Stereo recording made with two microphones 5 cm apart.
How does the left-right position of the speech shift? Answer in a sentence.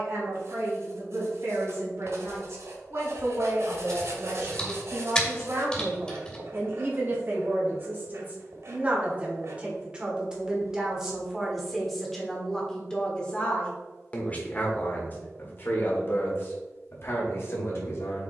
In this clip you hear the speech go from the right side to the left.